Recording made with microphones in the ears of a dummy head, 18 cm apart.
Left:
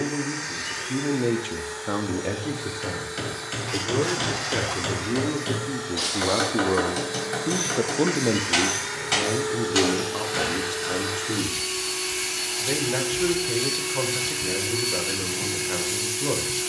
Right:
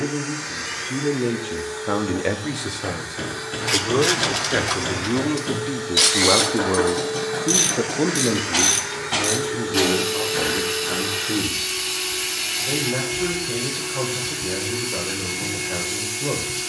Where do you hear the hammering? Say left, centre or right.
left.